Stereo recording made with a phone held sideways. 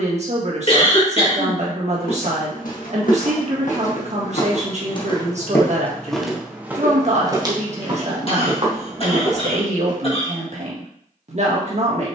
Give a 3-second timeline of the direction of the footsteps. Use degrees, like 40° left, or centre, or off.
70° left, 40° left, 30° right, 50° right.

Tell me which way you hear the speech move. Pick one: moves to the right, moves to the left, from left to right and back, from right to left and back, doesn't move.
doesn't move.